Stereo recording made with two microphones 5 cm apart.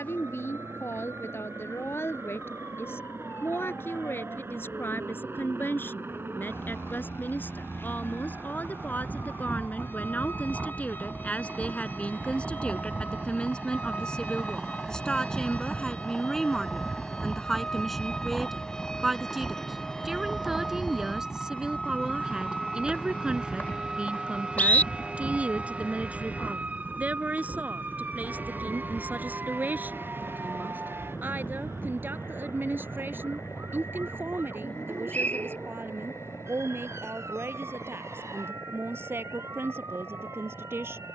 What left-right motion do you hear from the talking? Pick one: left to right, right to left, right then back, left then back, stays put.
left to right.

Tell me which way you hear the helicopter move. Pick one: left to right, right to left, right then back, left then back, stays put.
right to left.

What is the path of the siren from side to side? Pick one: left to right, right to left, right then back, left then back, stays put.
left to right.